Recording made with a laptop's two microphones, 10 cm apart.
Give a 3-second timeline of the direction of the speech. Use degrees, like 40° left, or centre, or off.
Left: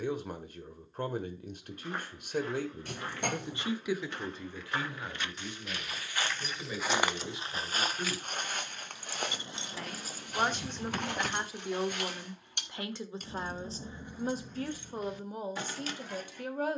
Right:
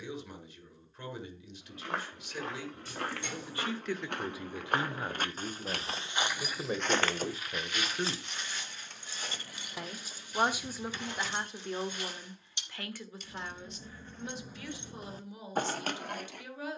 50° left, 20° right, 40° right, centre, 30° left, 50° left.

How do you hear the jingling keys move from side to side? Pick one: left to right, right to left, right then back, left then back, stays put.
left then back.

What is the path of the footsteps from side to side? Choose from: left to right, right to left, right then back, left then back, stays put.
right to left.